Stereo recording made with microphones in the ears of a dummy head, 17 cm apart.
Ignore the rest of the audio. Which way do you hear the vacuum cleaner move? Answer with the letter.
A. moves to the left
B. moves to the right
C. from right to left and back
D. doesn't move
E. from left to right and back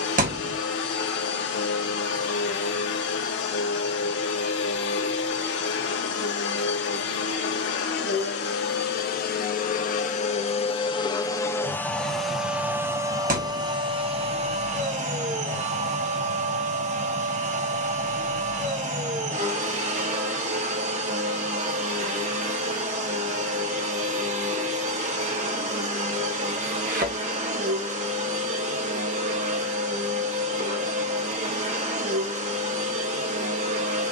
B.